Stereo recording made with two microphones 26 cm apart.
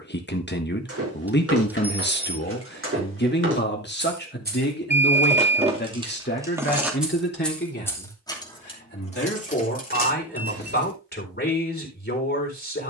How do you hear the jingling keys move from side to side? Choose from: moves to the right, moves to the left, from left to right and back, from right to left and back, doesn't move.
moves to the left.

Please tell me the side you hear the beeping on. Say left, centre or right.
centre.